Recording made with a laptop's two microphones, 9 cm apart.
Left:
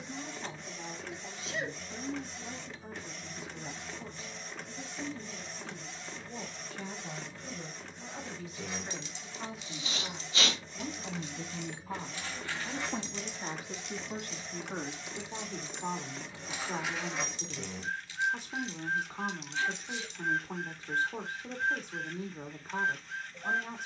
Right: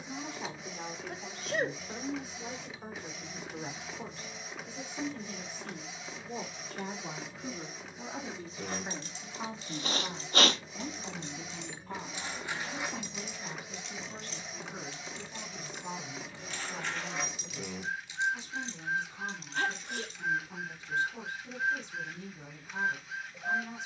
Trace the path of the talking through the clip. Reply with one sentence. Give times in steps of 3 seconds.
You can hear the talking on the right from 0 s, in the centre from 9 s and on the left from 12 s.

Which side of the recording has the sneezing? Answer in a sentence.
You can hear the sneezing on the right.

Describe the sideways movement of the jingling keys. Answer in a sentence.
You can hear the jingling keys go left and come back.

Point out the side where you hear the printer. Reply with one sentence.
In this clip you hear the printer in the centre.